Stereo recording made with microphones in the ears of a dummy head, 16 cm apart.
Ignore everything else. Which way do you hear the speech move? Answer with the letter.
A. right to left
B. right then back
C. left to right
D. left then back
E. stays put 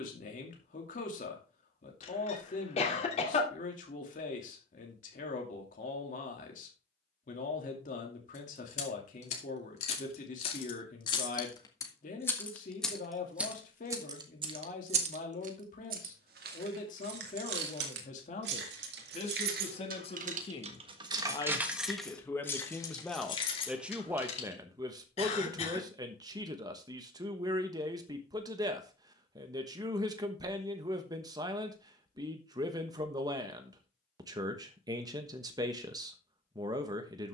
C.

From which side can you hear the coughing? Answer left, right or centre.
left.